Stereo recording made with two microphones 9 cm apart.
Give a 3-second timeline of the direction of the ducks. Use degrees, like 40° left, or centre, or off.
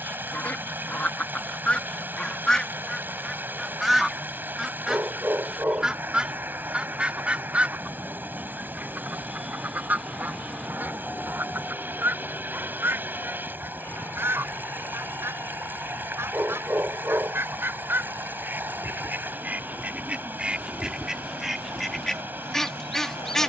10° left, centre, 10° right, 20° right, 30° right, 30° right, 20° right, centre.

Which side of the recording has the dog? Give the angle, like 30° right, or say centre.
20° right.